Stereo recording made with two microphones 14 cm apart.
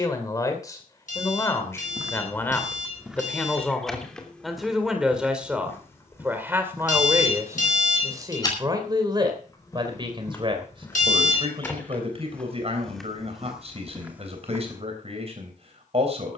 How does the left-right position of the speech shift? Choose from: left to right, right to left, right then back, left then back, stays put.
left to right.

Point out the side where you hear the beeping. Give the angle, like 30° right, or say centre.
70° left.